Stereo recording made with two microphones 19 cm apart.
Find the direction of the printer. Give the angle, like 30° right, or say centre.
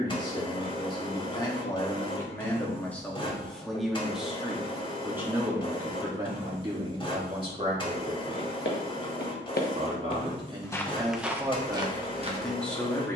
30° left.